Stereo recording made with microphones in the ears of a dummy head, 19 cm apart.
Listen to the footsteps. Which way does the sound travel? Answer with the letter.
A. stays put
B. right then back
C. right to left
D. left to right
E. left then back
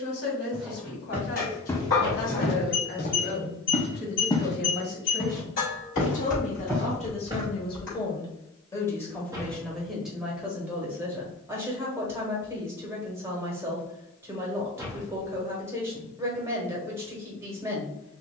E.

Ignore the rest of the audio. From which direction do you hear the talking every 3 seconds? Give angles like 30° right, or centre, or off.
50° left, 50° left, 30° left, centre, 10° right, 10° right.